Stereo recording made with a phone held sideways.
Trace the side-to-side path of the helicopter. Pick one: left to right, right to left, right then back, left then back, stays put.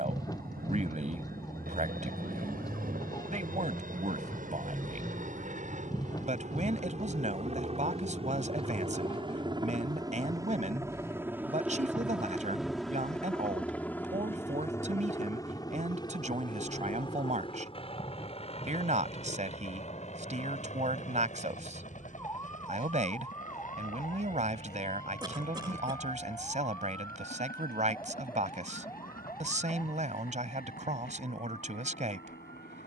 right to left.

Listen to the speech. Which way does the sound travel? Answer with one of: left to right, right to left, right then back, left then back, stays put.
stays put.